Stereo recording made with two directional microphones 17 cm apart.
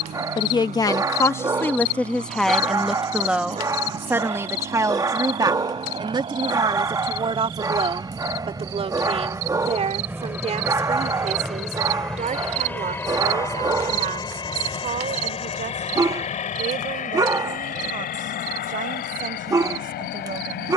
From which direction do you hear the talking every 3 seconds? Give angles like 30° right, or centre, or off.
10° left, 20° right, 30° right, 40° right, 50° right, 50° right, 50° right.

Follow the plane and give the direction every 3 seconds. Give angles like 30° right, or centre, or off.
50° right, 40° right, 30° right, 10° right, 20° left, 40° left, 60° left.